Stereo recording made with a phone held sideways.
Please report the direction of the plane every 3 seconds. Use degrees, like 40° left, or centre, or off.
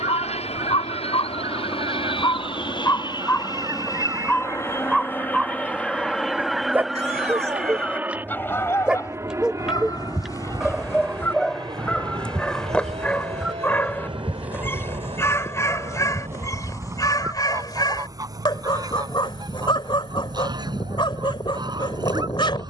50° left, 20° left, 10° right, 30° right, 40° right, 40° right, 50° right, 50° right.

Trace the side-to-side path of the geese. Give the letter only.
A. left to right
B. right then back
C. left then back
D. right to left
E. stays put
C.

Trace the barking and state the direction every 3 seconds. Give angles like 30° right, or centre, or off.
40° left, 10° left, 10° right, centre, 10° left, 30° left, 40° left, 40° left.